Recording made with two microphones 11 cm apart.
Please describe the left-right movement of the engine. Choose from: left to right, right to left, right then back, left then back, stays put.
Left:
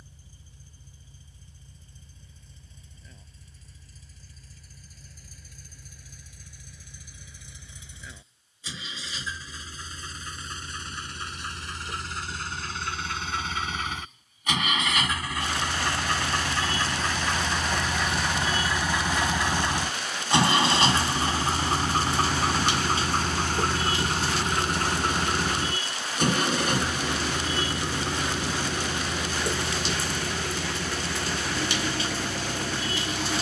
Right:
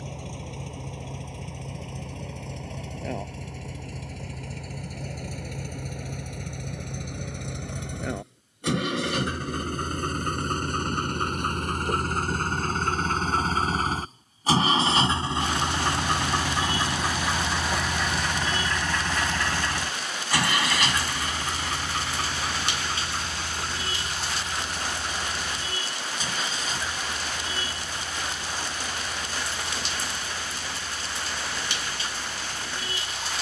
right to left.